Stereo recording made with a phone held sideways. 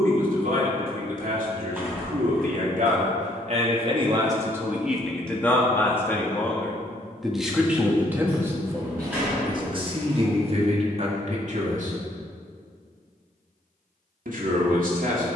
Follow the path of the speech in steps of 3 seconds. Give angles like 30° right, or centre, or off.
70° right, 10° right, 10° right, 40° right, 70° right.